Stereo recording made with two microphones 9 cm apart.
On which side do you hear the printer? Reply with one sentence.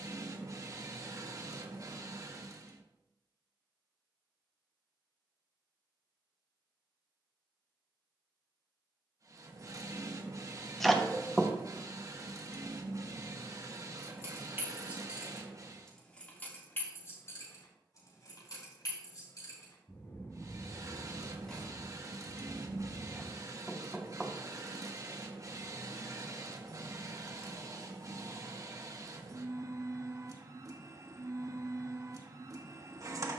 You can hear the printer on the right.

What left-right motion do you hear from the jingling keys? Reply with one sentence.
You can hear the jingling keys go left and come back.